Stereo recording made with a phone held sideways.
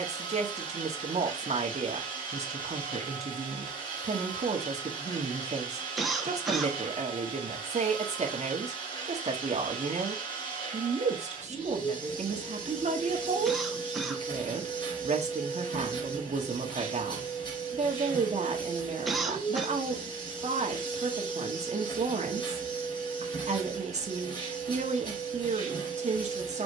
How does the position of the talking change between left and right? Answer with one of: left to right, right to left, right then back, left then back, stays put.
stays put.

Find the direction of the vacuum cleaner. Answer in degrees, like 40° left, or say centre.
30° left.